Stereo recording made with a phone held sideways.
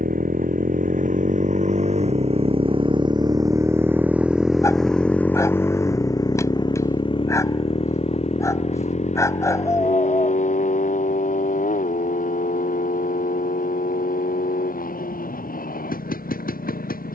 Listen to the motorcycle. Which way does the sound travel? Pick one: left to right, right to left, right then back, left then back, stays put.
right to left.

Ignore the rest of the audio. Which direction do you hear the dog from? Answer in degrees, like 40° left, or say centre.
20° left.